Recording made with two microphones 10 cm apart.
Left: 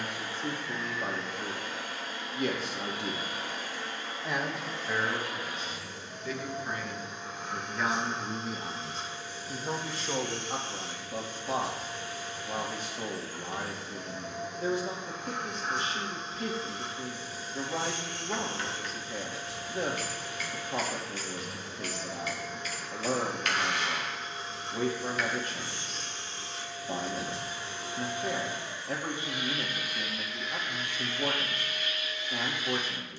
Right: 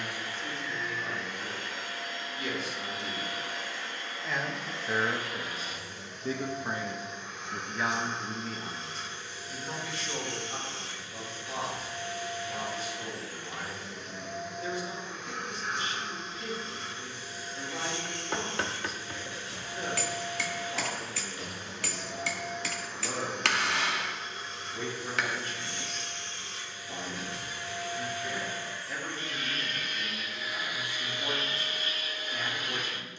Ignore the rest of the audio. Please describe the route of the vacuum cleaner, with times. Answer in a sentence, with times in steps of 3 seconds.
You can hear the vacuum cleaner on the left from 0 s and on the right from 30 s.